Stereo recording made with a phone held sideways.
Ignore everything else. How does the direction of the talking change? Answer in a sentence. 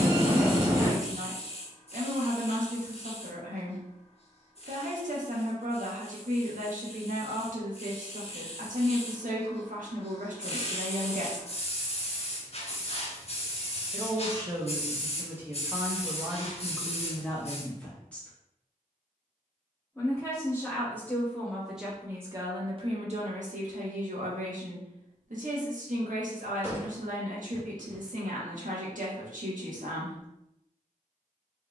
You can hear the talking go left and come back.